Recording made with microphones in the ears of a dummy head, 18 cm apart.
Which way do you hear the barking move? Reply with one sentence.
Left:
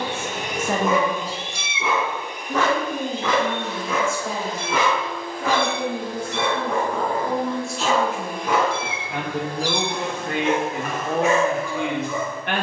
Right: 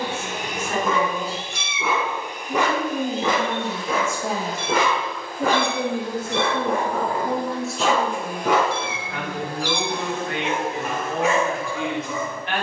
You can hear the barking move to the right.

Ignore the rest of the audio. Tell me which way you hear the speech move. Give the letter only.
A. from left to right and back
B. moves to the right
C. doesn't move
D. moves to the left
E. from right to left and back
A.